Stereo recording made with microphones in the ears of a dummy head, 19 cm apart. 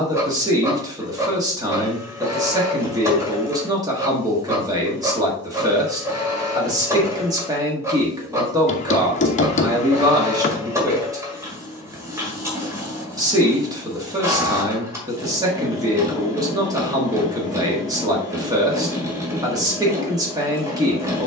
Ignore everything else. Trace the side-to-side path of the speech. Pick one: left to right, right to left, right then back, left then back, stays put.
stays put.